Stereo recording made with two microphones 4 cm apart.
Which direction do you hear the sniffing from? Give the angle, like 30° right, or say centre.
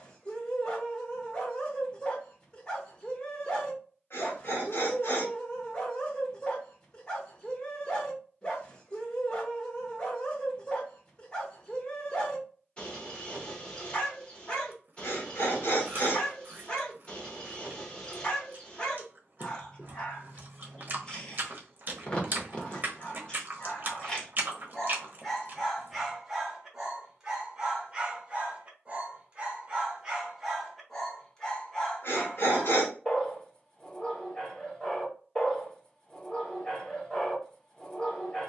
60° left.